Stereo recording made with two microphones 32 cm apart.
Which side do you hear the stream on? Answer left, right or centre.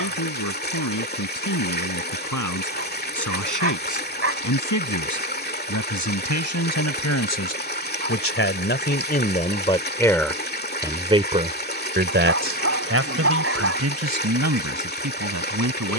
left.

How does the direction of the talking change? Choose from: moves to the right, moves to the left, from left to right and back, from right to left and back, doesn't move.
moves to the right.